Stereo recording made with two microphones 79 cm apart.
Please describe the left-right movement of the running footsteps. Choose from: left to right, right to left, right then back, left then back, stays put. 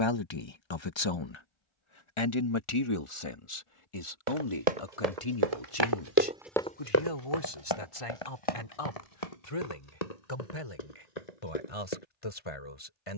right to left.